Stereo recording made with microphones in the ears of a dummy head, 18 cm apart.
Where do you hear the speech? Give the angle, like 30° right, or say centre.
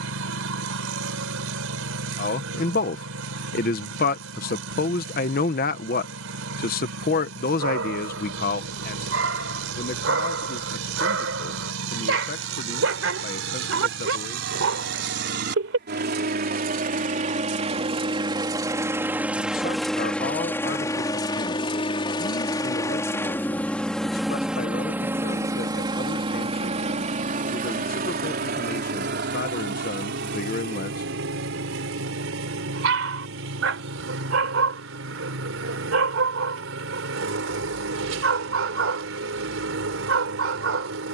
50° left.